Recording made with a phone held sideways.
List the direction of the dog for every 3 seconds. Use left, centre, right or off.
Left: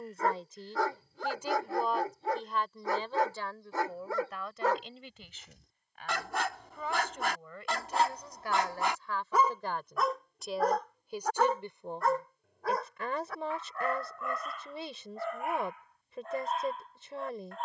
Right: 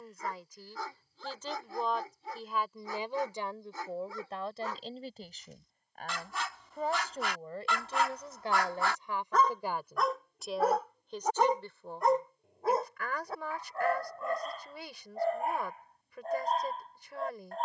left, left, left, centre, right, right.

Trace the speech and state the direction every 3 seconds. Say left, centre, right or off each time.
centre, right, right, centre, left, left.